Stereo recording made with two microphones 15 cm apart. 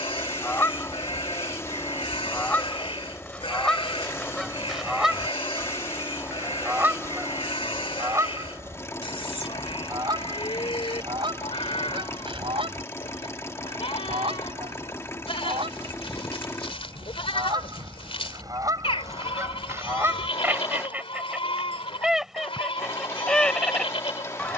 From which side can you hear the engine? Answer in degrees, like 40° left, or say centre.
20° left.